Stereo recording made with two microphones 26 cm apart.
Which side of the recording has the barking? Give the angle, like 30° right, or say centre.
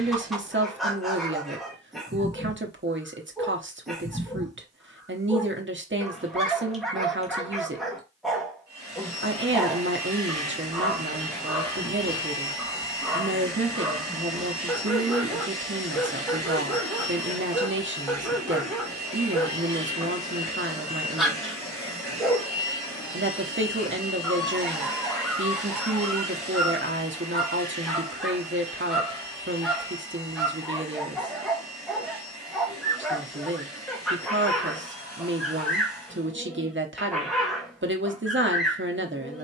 centre.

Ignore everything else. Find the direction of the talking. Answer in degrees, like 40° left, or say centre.
50° right.